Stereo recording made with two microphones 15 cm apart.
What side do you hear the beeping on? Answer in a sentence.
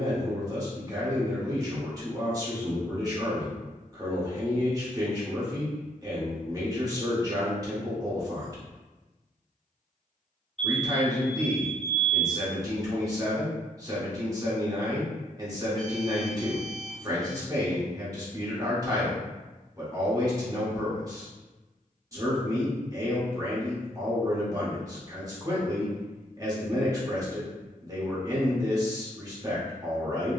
You can hear the beeping in the centre.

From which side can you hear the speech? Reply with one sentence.
In this clip you hear the speech on the right.